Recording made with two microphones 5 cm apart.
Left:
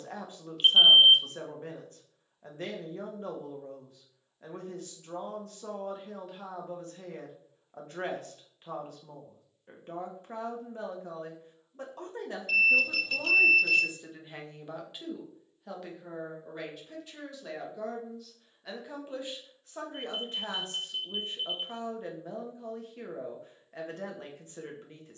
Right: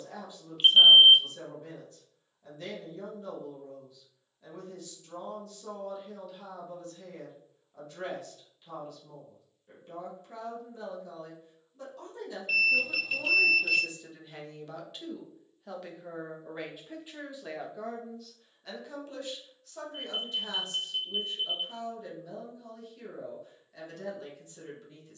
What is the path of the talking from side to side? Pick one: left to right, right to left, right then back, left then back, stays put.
right then back.